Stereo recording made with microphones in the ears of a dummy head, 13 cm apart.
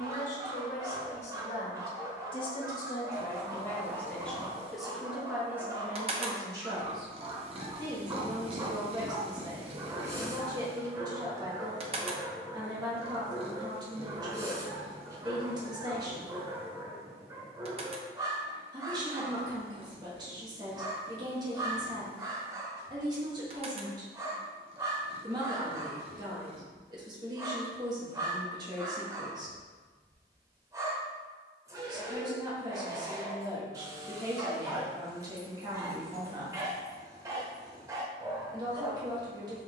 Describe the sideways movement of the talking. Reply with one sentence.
You can hear the talking go from the left side to the right.